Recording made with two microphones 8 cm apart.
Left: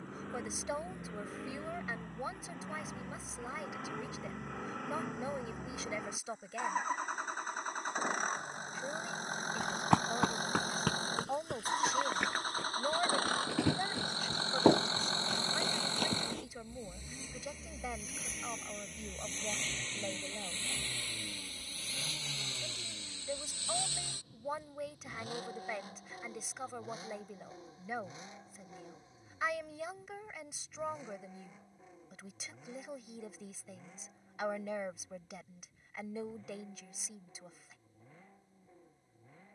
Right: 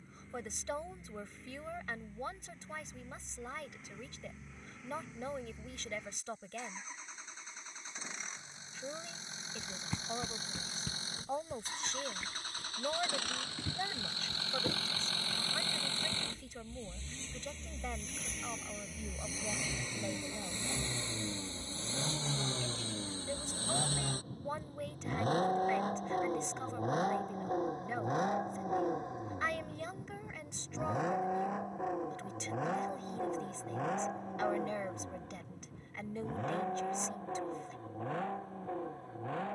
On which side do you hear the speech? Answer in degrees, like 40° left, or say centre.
10° left.